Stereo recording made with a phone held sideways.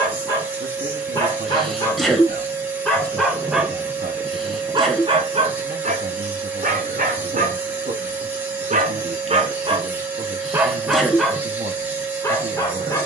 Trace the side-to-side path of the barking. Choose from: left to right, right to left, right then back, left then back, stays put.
right then back.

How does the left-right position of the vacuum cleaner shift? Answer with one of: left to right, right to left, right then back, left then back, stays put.
stays put.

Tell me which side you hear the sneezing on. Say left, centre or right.
centre.